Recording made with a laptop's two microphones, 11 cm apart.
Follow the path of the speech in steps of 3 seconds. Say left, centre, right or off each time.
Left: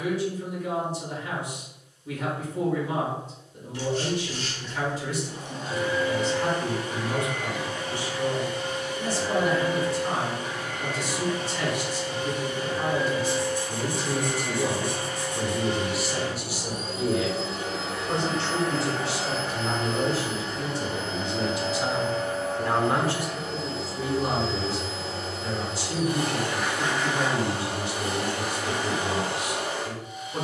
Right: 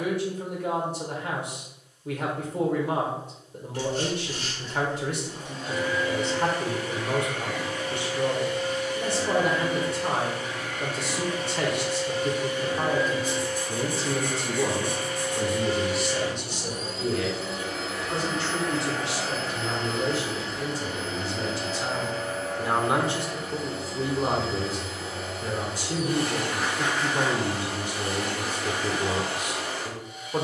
right, right, right, right, right, centre, left, centre, right, right.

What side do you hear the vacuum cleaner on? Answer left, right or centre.
left.